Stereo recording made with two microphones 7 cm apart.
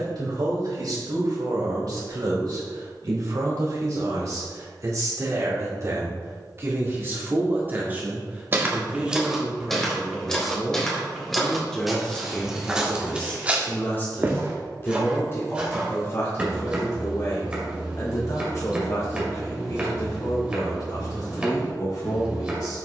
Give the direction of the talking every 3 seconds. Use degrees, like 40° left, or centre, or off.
60° right, 50° right, 30° right, centre, 20° left, 40° left, 50° left, 60° left.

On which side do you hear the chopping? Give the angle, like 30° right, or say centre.
20° right.